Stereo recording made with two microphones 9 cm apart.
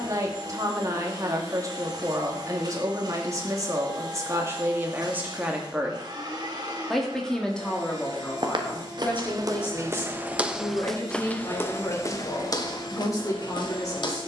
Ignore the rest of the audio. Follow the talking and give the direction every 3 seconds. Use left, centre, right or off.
right, right, centre, left, left.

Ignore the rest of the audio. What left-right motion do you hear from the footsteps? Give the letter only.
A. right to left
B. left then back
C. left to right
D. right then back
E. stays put
A.